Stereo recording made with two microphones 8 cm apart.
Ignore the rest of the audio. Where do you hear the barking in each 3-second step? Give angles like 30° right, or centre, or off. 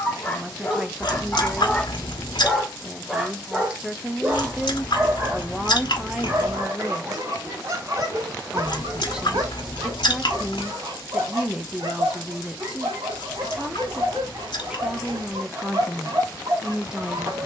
10° left, 20° right, 40° right, 50° right, 50° right, 50° right.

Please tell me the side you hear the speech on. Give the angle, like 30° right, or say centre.
10° right.